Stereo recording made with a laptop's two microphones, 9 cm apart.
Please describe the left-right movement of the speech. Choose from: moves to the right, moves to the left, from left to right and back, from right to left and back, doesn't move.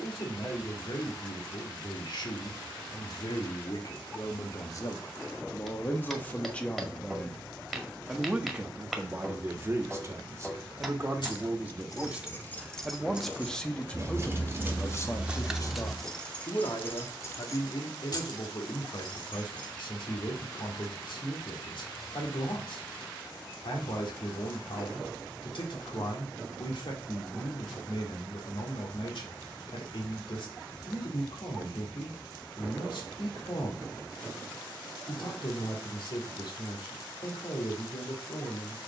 from left to right and back.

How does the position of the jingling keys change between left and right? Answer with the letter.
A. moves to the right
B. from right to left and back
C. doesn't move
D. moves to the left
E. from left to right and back
E.